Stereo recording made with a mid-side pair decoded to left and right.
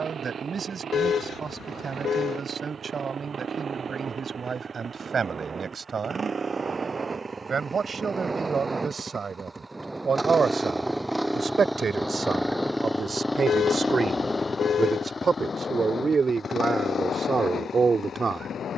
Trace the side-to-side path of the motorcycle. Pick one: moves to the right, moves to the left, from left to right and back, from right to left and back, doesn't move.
moves to the left.